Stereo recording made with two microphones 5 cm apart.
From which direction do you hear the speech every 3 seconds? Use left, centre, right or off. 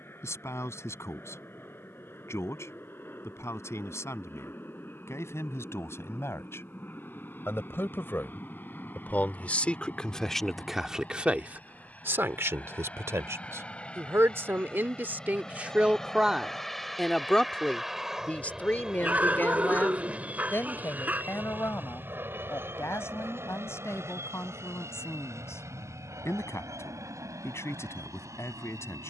left, left, left, centre, right, centre, left, left, left, left.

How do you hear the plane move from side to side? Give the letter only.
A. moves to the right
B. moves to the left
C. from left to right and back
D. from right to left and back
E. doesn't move
A.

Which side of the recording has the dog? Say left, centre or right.
right.